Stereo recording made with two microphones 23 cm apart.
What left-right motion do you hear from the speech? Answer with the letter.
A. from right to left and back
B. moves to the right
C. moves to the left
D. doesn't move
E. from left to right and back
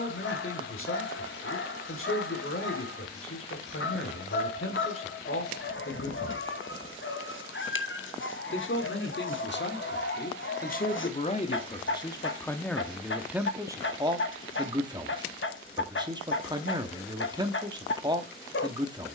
B.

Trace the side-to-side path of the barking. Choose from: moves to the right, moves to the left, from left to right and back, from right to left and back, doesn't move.
doesn't move.